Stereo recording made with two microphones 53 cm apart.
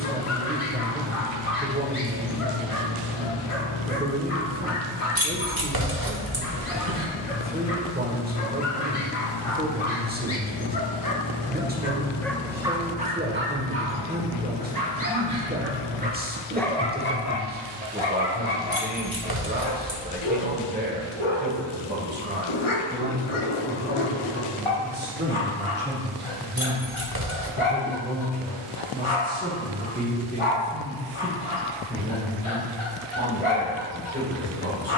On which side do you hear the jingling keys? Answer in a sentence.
You can hear the jingling keys on the right.